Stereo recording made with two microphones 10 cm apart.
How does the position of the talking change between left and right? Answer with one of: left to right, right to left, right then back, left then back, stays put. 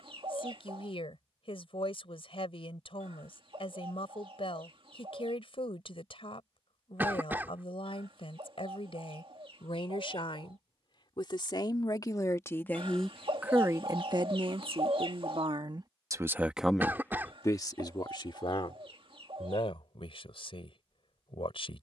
right then back.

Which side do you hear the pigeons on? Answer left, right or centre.
right.